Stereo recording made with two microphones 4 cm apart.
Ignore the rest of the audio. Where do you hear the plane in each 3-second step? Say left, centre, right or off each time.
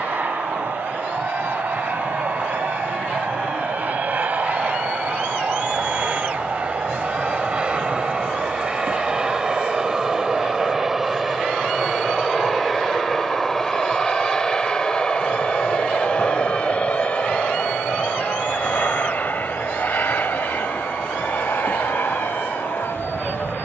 right, right, right, centre, centre, left, left, left.